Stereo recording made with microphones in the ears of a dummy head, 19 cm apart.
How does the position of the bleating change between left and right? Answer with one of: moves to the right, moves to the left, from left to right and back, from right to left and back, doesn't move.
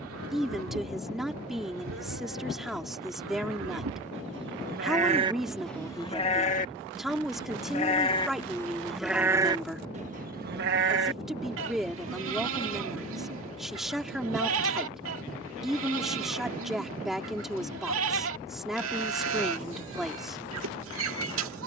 from right to left and back.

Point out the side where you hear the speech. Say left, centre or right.
centre.